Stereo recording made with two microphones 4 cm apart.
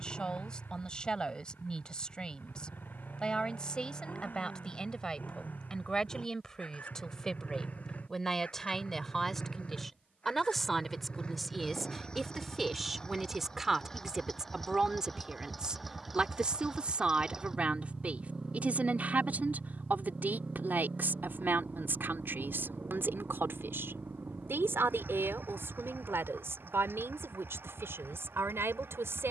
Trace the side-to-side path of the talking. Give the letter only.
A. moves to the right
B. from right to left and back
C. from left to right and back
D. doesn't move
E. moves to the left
A.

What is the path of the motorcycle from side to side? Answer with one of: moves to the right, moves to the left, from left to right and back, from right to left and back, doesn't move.
moves to the right.